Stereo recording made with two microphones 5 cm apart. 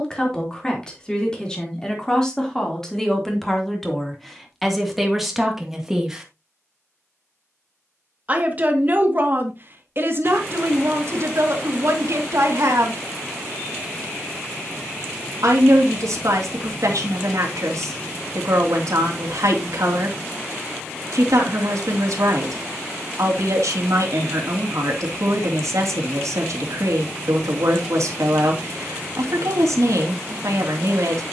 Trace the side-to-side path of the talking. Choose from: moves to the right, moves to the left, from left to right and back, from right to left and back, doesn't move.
moves to the right.